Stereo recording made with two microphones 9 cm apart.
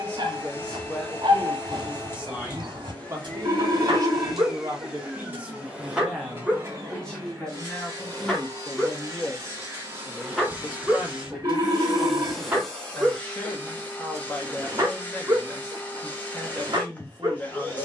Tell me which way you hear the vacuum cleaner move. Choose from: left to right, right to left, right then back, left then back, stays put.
right then back.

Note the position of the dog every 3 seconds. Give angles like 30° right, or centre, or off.
50° right, 40° right, centre, centre, 20° right, 50° right.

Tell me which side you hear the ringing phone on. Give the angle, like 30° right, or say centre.
30° right.